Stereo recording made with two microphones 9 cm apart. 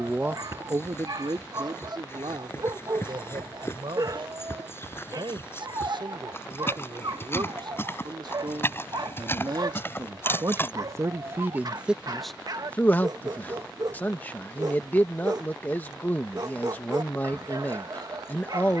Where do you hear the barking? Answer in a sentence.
In this clip you hear the barking on the right.